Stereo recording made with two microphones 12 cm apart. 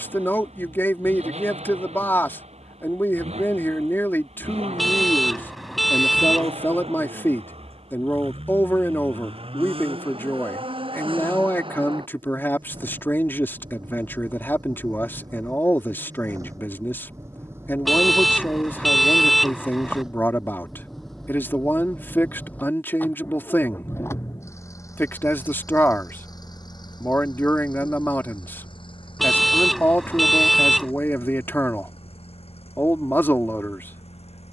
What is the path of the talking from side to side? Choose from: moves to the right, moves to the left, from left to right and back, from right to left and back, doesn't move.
doesn't move.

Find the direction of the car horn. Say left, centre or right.
centre.